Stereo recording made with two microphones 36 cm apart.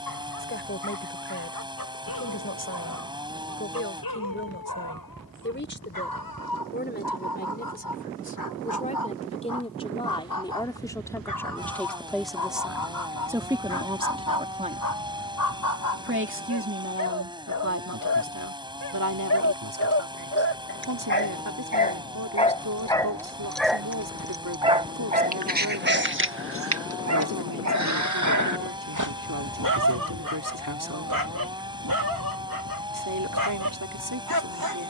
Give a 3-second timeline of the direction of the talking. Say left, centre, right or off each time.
left, left, left, centre, centre, right, right, right, right, right, right, right.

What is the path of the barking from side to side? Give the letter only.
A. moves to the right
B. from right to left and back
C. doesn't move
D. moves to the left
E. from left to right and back
A.